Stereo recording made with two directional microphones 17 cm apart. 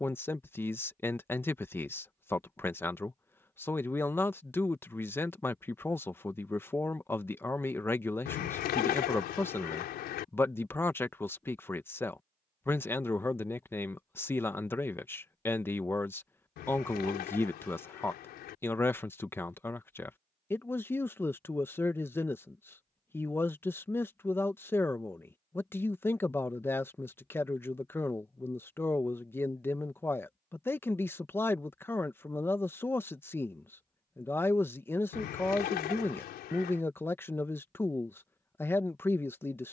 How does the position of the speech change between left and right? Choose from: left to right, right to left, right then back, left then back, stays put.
stays put.